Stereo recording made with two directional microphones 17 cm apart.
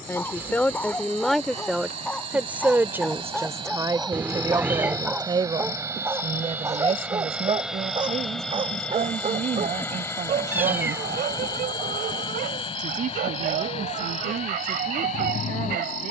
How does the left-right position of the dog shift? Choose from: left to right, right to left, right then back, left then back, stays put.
left to right.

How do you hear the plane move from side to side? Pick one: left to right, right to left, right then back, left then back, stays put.
right to left.